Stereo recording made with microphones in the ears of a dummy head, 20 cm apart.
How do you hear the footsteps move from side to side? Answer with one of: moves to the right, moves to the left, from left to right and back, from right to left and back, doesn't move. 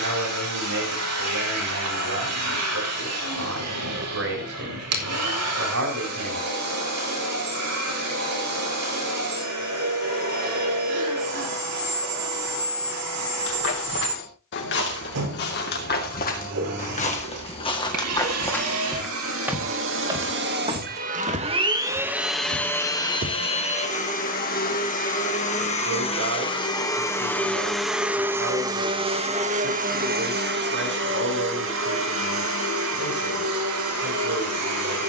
moves to the right.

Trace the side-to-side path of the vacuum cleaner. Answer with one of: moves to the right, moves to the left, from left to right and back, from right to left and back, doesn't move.
from right to left and back.